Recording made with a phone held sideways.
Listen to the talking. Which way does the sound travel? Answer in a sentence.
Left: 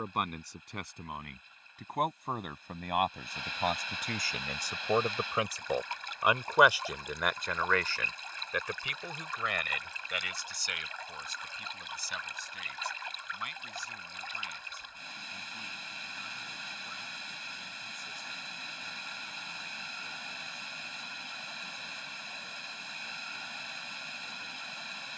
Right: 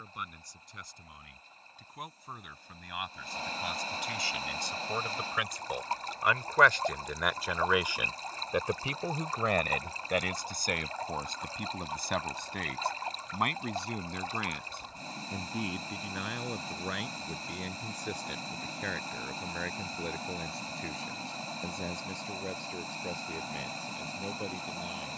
In this clip you hear the talking travel towards the right.